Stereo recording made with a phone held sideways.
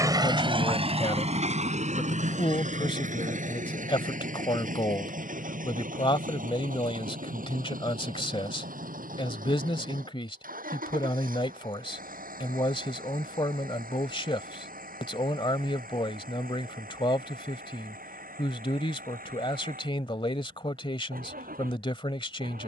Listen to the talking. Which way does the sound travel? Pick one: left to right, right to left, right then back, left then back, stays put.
stays put.